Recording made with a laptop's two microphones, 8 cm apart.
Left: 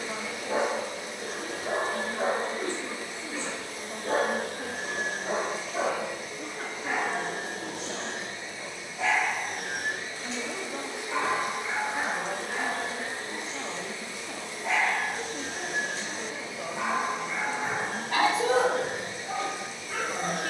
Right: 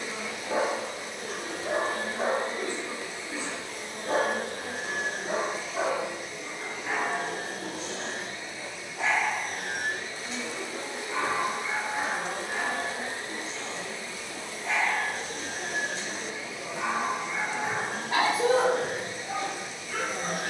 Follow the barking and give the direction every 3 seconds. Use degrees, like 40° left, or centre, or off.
40° left, 40° left, centre, centre, 40° left, 40° left, 40° left.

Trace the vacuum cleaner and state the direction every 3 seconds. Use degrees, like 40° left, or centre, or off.
40° left, 40° left, 30° left, 10° left, centre, 30° left, 40° left.